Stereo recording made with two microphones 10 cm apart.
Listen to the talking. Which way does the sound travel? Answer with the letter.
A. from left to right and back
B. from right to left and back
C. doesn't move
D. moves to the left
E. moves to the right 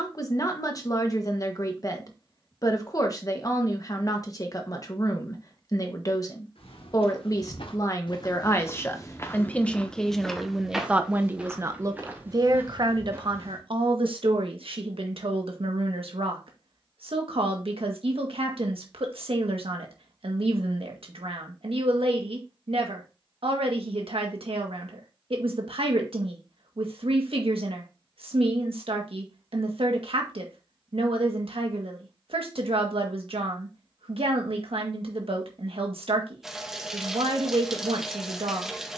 E.